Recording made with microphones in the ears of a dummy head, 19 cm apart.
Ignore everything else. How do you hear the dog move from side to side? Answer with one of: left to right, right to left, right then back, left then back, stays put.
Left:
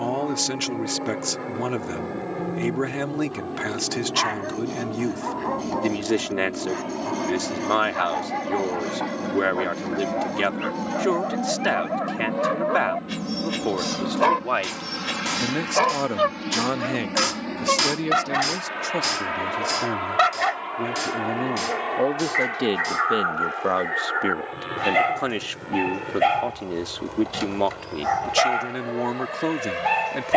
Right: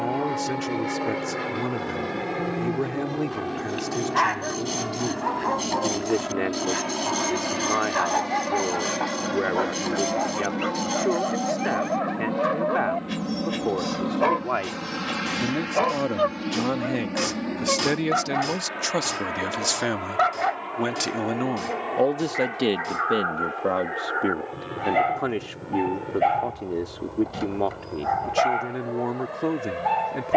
right to left.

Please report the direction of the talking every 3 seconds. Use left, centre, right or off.
left, left, left, left, left, left, right, centre, left, left.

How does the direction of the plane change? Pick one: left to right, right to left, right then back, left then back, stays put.
right to left.